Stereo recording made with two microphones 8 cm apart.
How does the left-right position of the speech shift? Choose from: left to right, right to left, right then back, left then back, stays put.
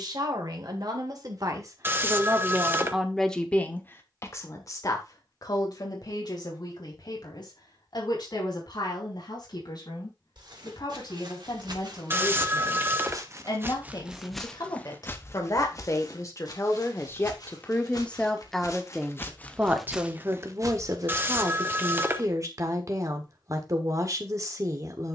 left then back.